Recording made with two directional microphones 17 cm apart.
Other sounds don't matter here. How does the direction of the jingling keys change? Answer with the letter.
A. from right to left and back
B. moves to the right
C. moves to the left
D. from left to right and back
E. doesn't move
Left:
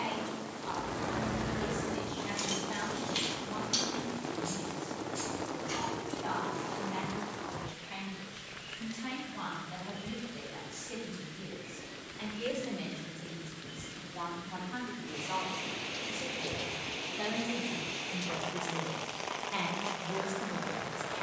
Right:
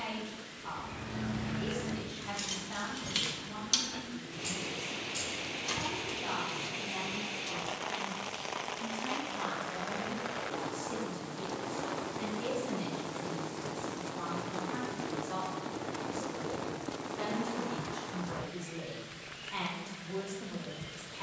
B.